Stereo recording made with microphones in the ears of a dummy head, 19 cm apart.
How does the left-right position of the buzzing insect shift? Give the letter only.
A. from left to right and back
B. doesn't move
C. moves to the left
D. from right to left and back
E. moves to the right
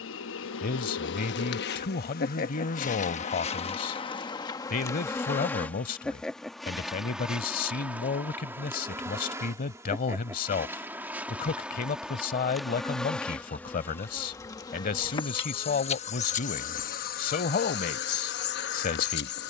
A.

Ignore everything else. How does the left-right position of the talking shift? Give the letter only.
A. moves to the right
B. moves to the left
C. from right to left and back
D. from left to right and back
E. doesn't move
E.